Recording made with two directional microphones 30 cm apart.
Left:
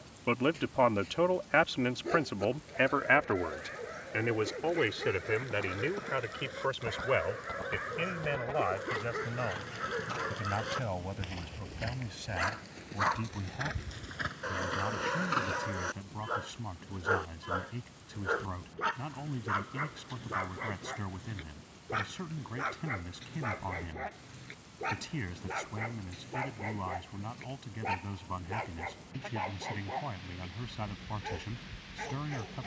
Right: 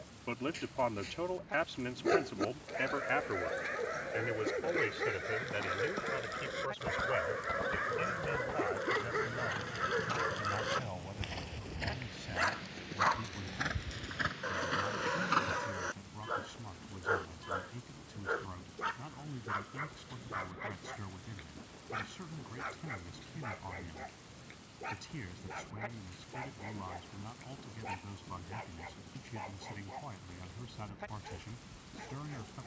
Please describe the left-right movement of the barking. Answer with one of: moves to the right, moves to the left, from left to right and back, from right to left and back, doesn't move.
moves to the left.